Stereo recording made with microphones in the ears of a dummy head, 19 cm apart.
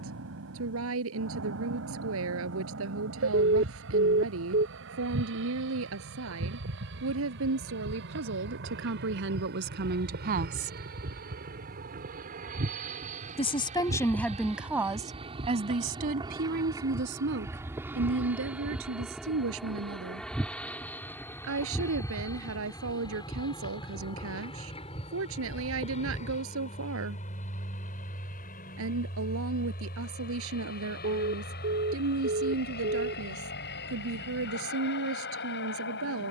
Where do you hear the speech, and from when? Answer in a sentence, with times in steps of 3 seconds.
In this clip you hear the speech on the right from 0 s, in the centre from 12 s and on the right from 15 s.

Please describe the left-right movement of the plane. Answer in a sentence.
You can hear the plane go from the right side to the left.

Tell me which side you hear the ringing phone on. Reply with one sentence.
You can hear the ringing phone on the right.